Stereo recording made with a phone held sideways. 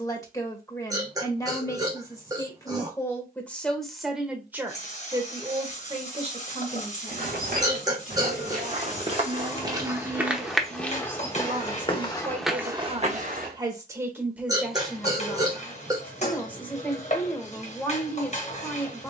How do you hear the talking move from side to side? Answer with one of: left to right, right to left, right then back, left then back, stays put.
right then back.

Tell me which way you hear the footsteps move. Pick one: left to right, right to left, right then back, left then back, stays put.
left then back.